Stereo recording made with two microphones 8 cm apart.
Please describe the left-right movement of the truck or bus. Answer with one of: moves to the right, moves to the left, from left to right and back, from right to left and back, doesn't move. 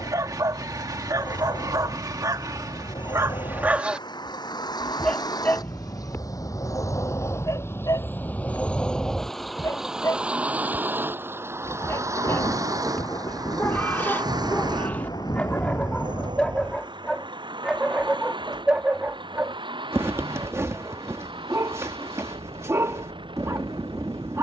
moves to the right.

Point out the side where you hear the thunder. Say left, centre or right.
left.